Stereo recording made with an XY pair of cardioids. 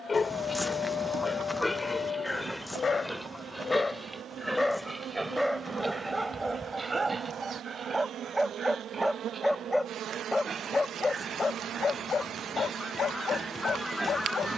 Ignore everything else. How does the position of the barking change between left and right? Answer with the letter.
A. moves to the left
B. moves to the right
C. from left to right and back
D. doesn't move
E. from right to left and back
C.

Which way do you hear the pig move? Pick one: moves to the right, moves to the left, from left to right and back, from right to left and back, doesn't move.
moves to the right.